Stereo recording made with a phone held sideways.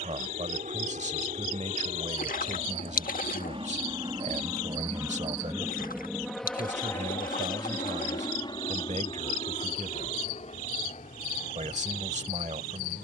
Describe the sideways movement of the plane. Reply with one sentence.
You can hear the plane travel towards the left.